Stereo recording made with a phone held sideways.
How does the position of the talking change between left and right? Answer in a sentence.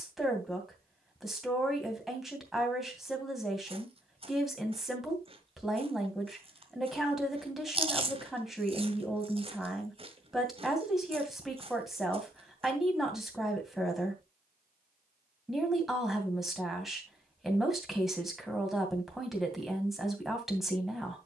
You can hear the talking stay in one place.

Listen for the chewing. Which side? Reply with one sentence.
In this clip you hear the chewing on the right.